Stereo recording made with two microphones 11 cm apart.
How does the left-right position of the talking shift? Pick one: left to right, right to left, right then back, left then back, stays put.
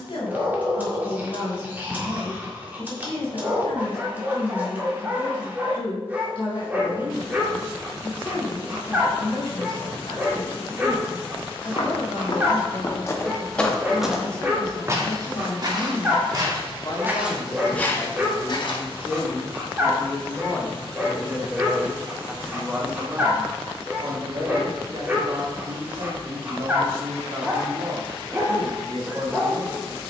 left to right.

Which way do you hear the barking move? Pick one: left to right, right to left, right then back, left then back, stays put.
stays put.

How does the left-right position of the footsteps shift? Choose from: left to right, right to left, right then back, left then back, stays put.
right then back.